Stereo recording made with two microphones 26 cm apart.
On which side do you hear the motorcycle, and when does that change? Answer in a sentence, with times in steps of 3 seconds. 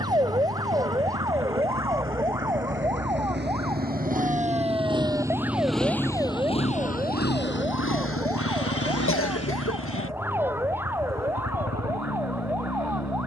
You can hear the motorcycle on the right from 0 s and on the left from 6 s.